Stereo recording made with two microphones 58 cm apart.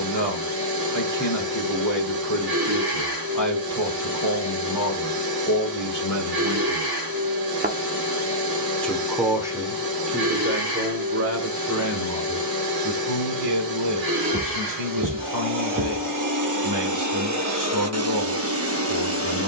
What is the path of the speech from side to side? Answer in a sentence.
You can hear the speech move to the right.